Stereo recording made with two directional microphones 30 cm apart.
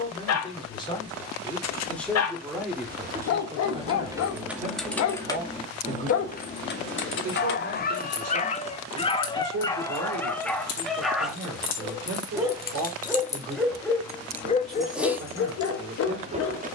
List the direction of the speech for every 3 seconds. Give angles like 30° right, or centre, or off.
10° left, 20° right, 50° right, 60° right, 60° right, 60° right.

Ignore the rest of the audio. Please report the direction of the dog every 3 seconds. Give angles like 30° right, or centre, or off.
60° left, 60° left, 30° left, 10° left, 10° left, 50° left.